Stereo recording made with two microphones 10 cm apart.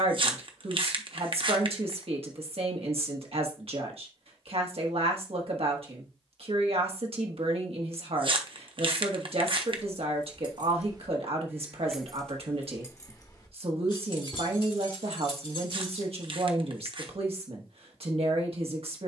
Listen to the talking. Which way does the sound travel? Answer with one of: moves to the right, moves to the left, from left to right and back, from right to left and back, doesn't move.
doesn't move.